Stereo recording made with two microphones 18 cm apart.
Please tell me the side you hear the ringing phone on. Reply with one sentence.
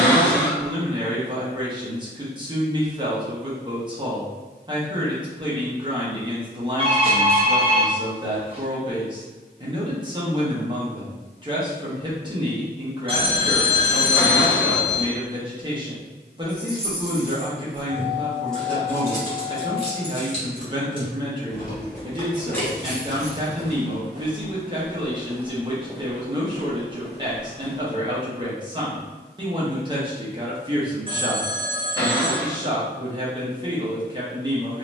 In this clip you hear the ringing phone on the right.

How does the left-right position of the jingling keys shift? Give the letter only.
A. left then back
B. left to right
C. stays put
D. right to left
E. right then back
A.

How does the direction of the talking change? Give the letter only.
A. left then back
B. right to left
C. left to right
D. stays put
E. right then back
D.